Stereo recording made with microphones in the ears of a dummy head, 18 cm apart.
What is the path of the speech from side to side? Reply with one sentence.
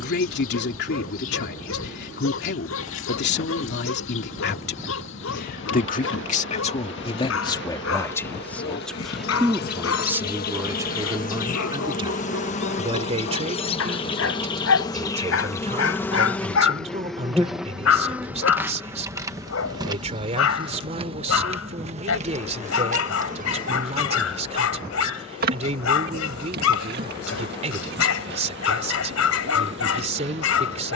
You can hear the speech travel towards the right.